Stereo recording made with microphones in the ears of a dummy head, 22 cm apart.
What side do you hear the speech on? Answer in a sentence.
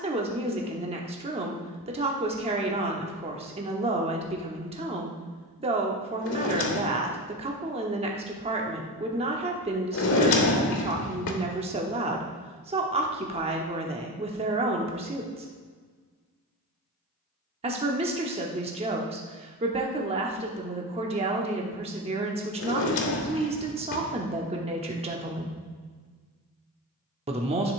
You can hear the speech on the right.